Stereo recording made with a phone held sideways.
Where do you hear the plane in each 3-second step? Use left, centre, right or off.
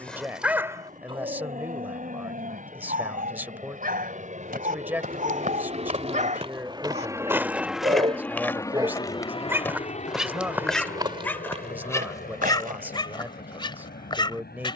right, right, centre, left, left.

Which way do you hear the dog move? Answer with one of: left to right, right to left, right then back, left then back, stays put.
right then back.